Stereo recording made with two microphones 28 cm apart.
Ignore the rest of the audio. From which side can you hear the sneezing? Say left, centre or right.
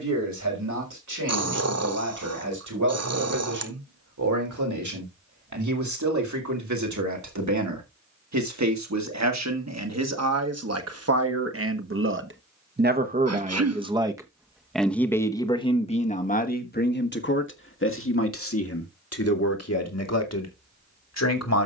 right.